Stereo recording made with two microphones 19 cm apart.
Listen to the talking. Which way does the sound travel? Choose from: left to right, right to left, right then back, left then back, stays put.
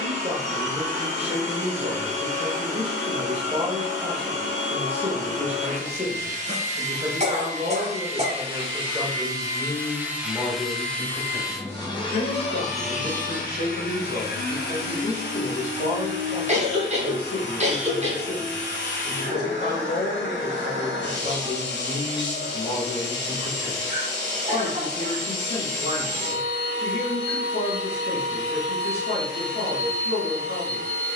right to left.